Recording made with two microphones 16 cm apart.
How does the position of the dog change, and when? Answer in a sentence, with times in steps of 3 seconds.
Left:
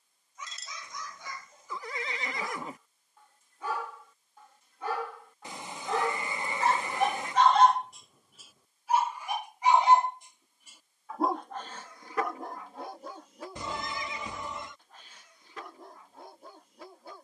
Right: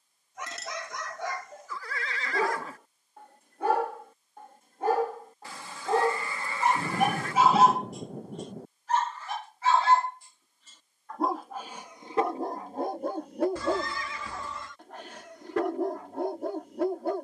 You can hear the dog on the right from 0 s, in the centre from 6 s and on the right from 12 s.